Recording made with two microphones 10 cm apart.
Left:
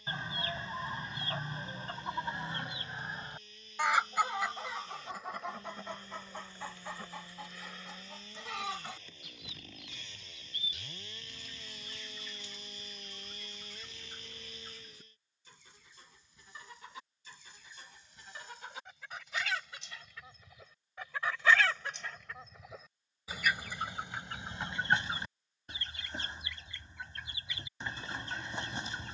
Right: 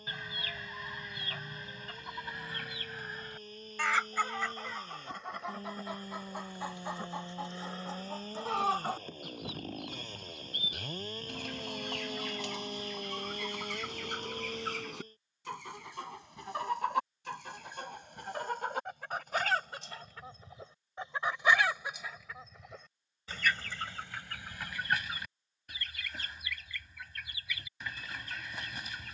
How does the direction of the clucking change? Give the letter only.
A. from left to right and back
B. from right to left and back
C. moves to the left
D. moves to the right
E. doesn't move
A.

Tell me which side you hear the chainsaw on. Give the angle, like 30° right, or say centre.
40° right.